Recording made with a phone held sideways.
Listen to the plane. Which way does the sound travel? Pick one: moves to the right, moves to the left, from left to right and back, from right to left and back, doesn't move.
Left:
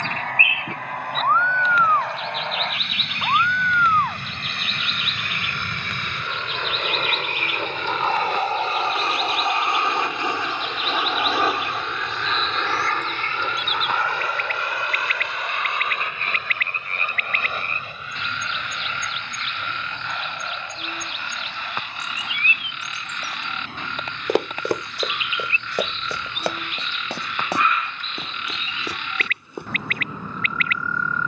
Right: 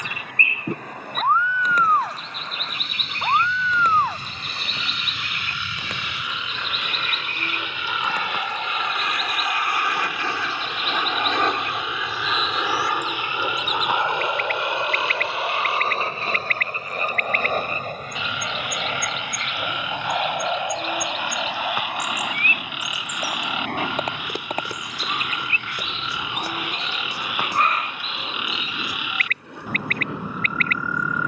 moves to the right.